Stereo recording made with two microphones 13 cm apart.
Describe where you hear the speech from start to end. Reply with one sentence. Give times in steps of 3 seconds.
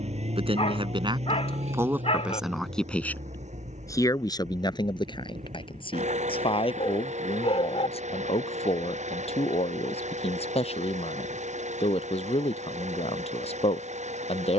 You can hear the speech on the right from 0 s and on the left from 3 s.